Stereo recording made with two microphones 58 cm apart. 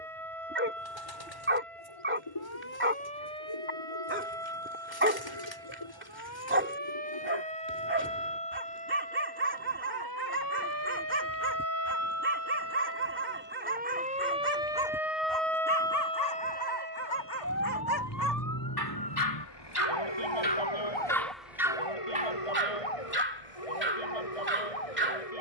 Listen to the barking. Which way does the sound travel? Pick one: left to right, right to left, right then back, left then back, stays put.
left then back.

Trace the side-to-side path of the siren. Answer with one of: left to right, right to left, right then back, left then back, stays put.
right to left.